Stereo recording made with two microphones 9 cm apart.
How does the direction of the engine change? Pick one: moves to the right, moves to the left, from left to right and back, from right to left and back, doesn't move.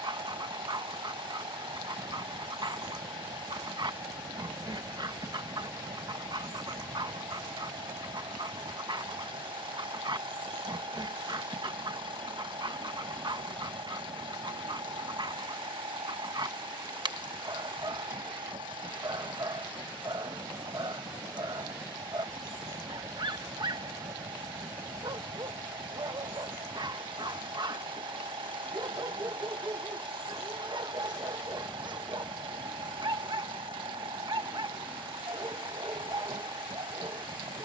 doesn't move.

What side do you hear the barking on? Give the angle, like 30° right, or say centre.
60° right.